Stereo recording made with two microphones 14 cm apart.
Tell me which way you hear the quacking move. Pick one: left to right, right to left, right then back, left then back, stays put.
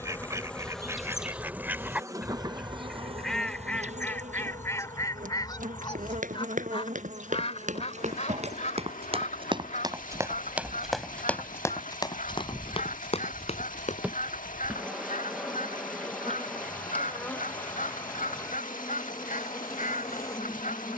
right to left.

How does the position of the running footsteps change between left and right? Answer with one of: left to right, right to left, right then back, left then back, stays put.
right to left.